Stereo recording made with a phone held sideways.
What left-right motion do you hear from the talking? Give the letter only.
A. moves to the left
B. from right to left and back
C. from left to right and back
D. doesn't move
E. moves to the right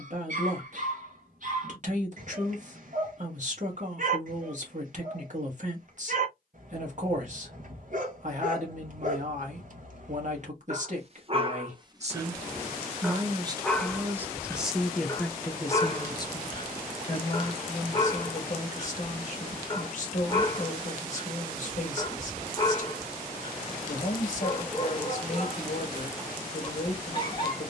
A.